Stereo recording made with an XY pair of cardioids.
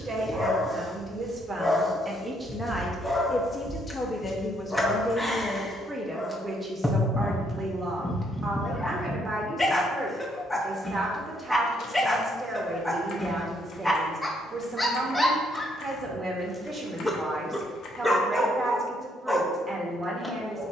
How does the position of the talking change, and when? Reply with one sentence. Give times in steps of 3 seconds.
In this clip you hear the talking on the right from 0 s, in the centre from 3 s and on the right from 6 s.